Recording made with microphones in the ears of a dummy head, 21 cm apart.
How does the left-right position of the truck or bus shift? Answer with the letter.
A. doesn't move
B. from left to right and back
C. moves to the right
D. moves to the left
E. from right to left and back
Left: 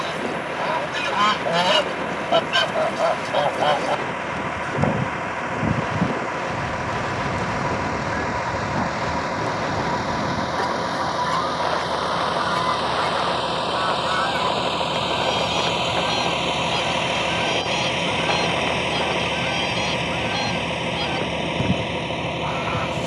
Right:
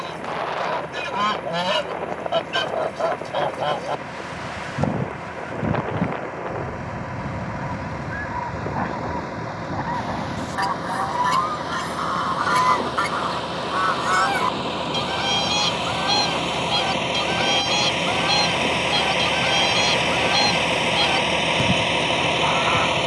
C.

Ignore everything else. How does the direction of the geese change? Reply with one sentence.
In this clip you hear the geese move to the right.